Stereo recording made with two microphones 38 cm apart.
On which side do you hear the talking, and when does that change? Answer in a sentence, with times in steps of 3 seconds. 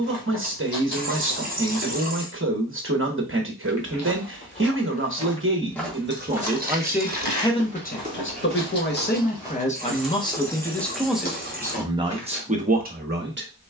In this clip you hear the talking on the right from 0 s, in the centre from 6 s and on the right from 12 s.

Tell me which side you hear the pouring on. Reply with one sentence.
In this clip you hear the pouring on the right.